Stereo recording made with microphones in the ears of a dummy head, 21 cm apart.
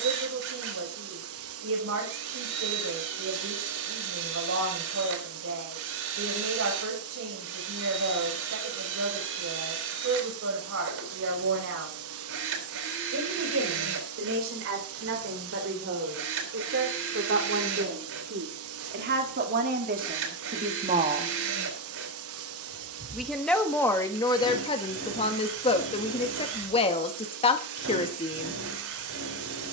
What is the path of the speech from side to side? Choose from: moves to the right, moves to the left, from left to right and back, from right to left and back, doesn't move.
moves to the left.